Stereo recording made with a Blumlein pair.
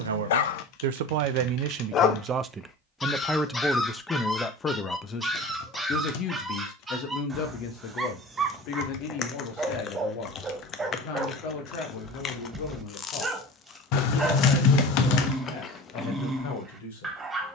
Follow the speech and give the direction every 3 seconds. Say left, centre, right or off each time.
right, centre, left, left, left, left.